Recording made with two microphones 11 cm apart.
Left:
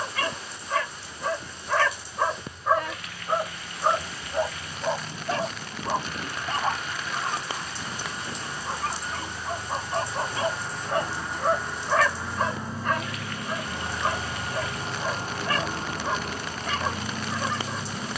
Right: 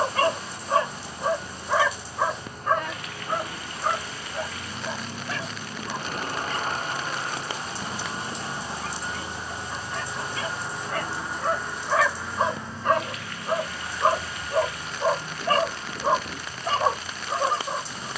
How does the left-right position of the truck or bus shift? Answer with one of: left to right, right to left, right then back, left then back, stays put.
right to left.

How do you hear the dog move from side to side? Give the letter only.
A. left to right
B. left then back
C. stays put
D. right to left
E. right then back
B.